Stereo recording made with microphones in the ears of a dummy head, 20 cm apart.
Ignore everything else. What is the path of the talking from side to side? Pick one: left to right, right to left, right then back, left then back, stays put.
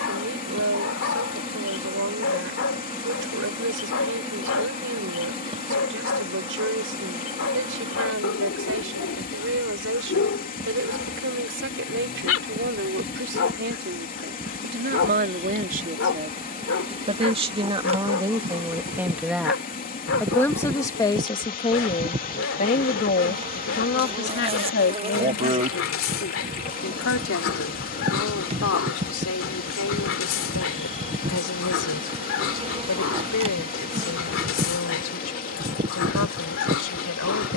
right to left.